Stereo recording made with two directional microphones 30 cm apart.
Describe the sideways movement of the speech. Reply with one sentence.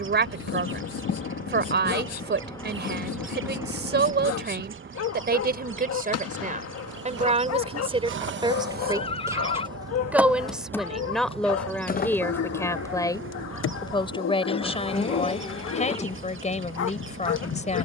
In this clip you hear the speech travel towards the left.